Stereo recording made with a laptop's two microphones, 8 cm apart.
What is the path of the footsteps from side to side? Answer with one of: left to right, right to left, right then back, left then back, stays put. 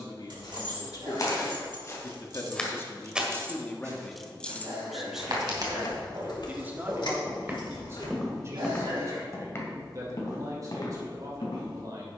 right then back.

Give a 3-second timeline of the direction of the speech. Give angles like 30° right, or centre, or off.
50° left, 10° left, 30° right, 40° right.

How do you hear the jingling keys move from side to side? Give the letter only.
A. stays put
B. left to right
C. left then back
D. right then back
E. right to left
E.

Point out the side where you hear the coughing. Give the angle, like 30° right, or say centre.
70° right.